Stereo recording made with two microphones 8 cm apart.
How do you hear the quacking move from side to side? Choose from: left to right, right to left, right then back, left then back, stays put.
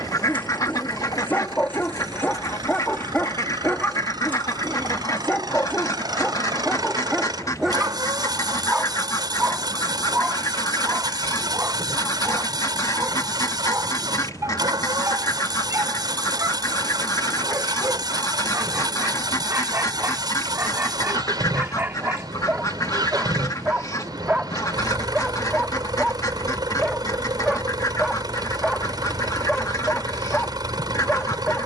stays put.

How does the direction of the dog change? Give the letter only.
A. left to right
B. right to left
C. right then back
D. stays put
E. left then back
C.